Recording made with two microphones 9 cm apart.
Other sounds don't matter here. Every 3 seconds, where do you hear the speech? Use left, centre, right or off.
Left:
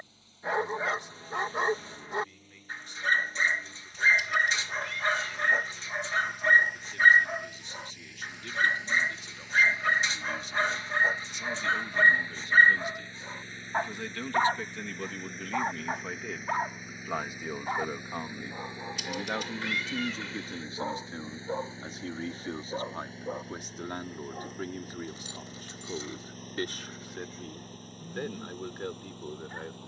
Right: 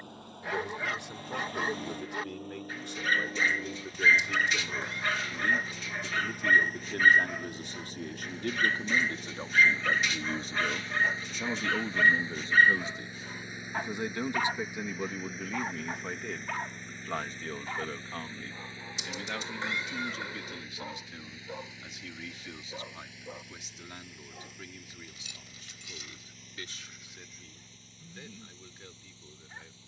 right, right, right, right, right, centre, left, left, left, left.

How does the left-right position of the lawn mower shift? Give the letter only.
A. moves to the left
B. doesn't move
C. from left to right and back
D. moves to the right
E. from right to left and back
A.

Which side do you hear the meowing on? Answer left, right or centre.
right.